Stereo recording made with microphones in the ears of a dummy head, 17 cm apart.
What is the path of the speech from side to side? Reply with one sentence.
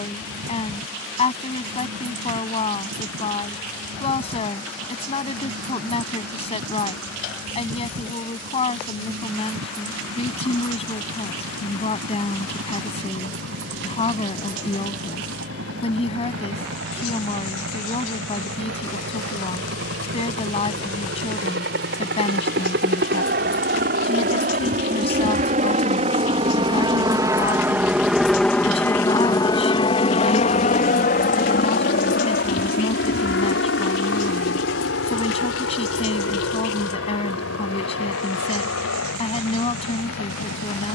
In this clip you hear the speech stay put.